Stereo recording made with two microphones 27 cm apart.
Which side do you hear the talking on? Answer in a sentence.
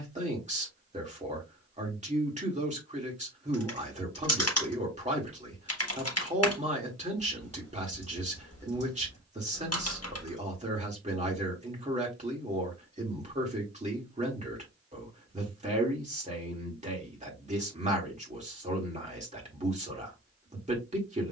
In this clip you hear the talking on the right.